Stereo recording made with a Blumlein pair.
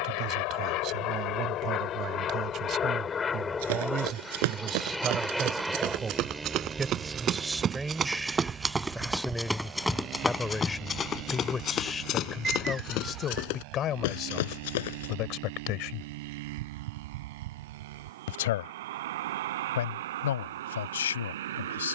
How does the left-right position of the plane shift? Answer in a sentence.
You can hear the plane move to the right.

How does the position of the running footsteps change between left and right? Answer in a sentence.
In this clip you hear the running footsteps move from right to left.